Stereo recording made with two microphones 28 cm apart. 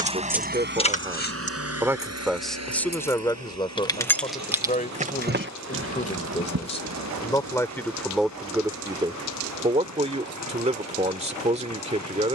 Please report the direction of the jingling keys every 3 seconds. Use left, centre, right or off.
left, centre, right, off.